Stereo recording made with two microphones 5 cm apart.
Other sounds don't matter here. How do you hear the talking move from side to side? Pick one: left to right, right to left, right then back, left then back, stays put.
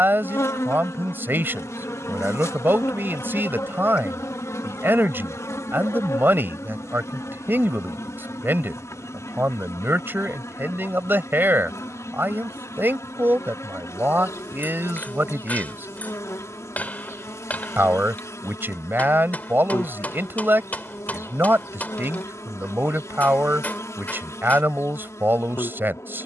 stays put.